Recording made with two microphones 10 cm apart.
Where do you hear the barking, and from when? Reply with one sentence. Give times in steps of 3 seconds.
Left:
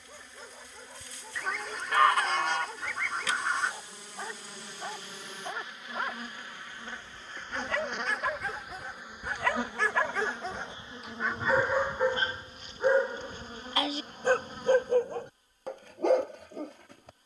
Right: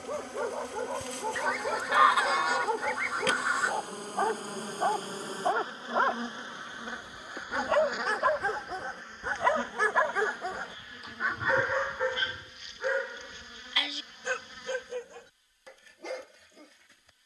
In this clip you hear the barking on the right from 0 s, in the centre from 9 s and on the left from 12 s.